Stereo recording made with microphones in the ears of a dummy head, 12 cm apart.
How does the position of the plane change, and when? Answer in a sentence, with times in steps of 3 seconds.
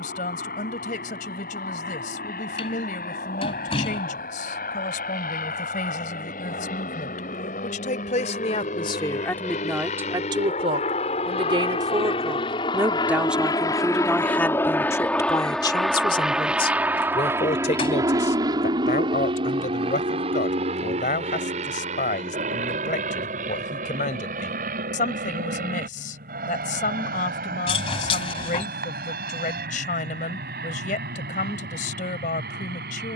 In this clip you hear the plane on the left from 0 s, in the centre from 15 s and on the right from 18 s.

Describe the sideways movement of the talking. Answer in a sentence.
In this clip you hear the talking go right and come back.